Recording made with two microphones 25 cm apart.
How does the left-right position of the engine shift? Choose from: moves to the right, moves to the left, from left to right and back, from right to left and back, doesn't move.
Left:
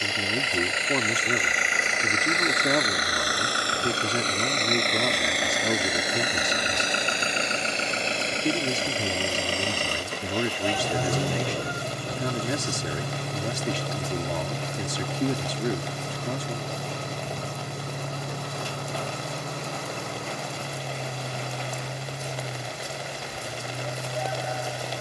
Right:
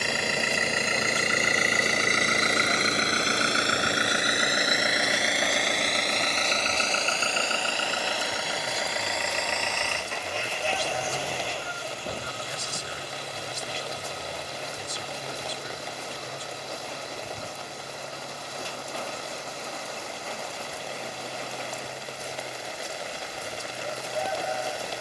moves to the left.